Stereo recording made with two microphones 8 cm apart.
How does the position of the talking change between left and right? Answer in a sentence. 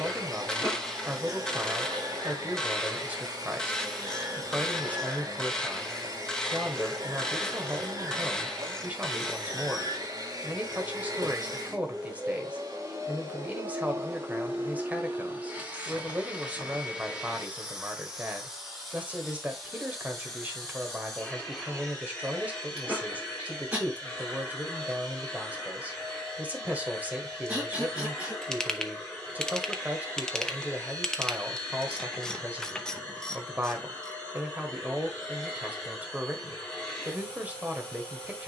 In this clip you hear the talking stay in one place.